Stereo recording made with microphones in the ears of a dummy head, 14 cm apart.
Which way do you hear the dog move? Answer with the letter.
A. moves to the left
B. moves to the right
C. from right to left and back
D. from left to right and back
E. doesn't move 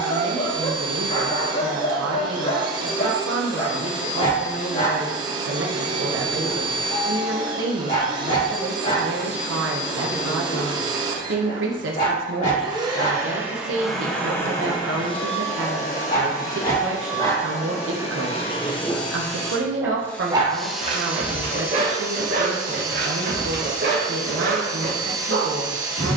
B.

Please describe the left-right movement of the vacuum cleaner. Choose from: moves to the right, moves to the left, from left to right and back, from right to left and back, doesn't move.
from right to left and back.